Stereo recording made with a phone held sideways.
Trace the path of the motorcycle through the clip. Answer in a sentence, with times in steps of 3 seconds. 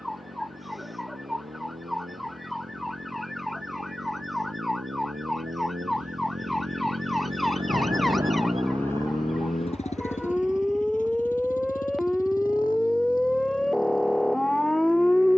You can hear the motorcycle on the right from 0 s and on the left from 9 s.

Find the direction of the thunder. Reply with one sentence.
You can hear the thunder on the right.